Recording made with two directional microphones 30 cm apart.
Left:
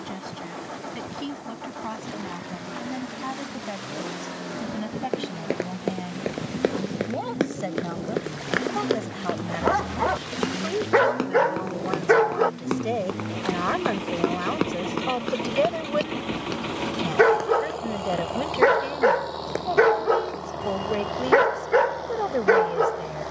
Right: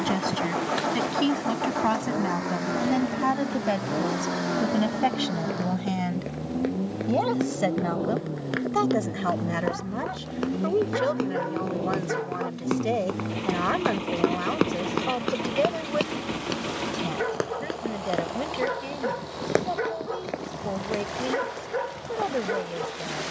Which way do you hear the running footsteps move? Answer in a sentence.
In this clip you hear the running footsteps move from left to right.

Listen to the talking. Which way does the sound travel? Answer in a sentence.
In this clip you hear the talking move to the left.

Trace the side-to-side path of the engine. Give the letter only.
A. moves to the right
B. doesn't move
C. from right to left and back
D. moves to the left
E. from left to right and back
D.